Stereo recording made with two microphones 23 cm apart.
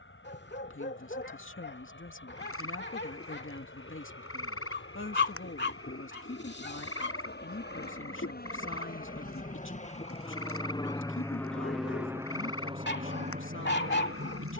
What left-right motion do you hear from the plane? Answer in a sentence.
You can hear the plane go from the left side to the right.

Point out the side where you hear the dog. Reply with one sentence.
In this clip you hear the dog on the left.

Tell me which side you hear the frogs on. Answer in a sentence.
You can hear the frogs on the left.